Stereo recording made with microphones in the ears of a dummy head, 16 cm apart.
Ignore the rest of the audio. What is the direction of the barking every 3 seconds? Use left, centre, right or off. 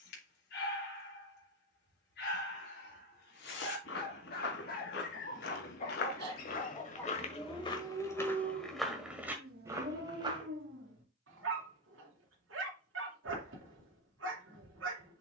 left, left, centre, right, right.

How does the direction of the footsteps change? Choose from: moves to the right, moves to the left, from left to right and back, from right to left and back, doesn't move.
moves to the right.